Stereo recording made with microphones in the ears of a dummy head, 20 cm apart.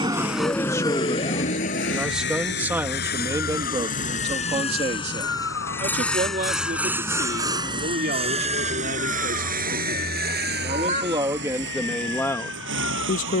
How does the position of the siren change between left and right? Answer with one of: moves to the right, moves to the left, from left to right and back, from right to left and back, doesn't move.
moves to the left.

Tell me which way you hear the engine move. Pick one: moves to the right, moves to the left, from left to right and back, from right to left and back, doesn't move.
moves to the right.